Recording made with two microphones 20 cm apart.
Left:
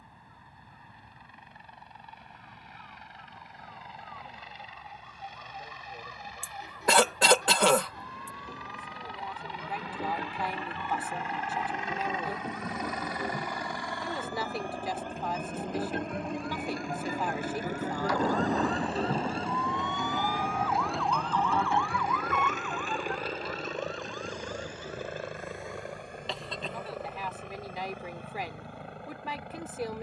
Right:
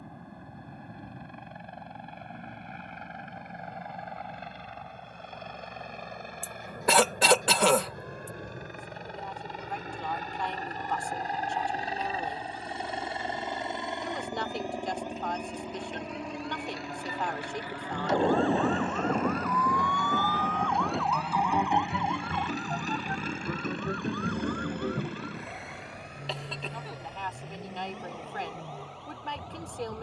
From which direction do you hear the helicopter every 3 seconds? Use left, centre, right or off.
right, right, right, right, right, centre, left, left, left, left.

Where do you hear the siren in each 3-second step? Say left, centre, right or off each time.
off, left, left, left, left, left, left, right, right, right.